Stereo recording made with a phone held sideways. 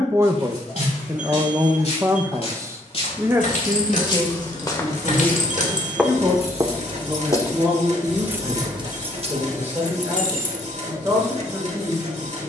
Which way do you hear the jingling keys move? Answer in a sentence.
In this clip you hear the jingling keys go from the left side to the right.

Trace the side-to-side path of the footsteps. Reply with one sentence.
You can hear the footsteps travel towards the right.